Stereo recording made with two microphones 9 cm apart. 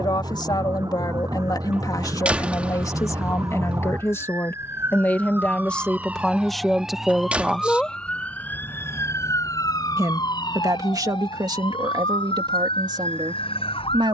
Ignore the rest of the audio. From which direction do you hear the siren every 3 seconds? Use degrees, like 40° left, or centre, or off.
40° right, 30° right, centre, 50° left, 80° left.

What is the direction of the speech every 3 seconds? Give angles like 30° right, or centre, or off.
50° left, 20° left, centre, 40° right, 50° right.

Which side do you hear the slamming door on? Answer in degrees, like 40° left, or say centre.
10° right.